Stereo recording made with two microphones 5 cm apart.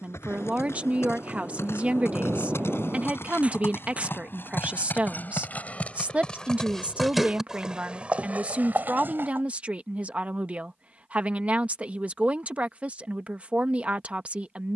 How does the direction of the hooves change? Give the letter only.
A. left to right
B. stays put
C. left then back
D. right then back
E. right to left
A.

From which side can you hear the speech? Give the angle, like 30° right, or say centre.
30° right.